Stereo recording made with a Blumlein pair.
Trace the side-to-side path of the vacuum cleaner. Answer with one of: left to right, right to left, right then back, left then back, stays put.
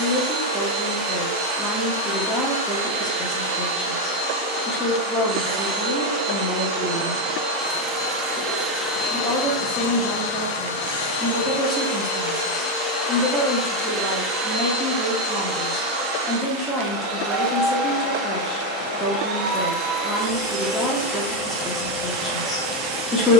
left then back.